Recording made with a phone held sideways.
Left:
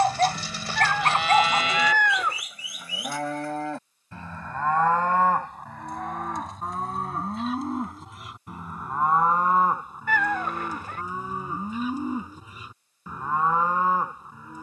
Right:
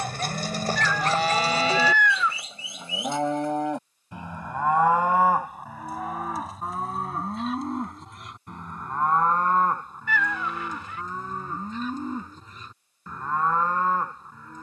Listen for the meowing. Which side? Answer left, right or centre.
left.